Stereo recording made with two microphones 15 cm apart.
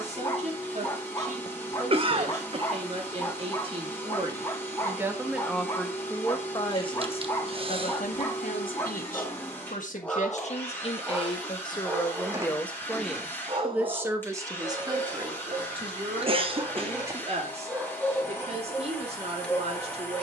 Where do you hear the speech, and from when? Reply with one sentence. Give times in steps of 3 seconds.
You can hear the speech on the right from 0 s, on the left from 6 s, in the centre from 12 s and on the right from 15 s.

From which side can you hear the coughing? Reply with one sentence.
In this clip you hear the coughing on the right.